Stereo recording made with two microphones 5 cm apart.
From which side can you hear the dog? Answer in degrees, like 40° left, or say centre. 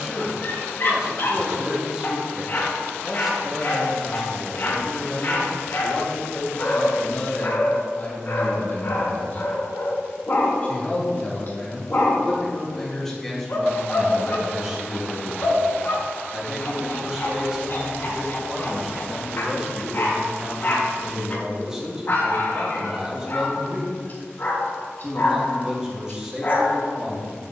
40° left.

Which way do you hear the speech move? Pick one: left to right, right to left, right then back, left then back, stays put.
left then back.